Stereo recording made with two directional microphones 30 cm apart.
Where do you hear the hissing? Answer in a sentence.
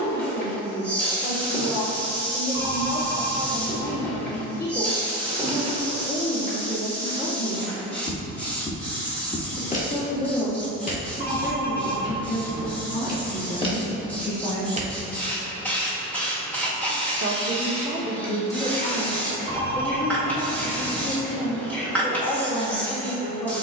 In this clip you hear the hissing in the centre.